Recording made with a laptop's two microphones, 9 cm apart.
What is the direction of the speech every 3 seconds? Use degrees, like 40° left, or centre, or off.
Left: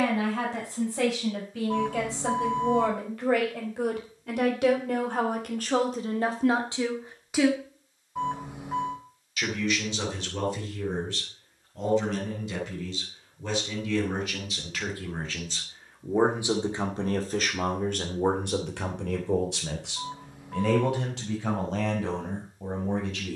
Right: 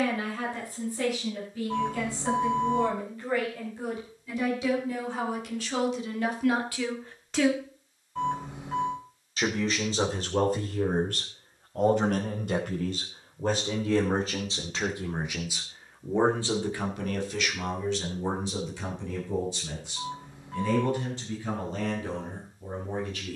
80° left, 60° left, 20° left, 40° right, 40° right, 20° left, 60° left, 80° left.